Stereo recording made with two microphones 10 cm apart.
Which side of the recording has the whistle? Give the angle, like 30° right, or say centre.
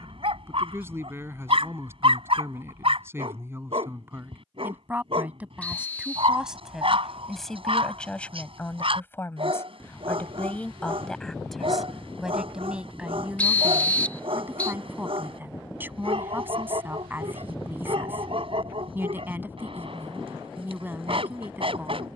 10° left.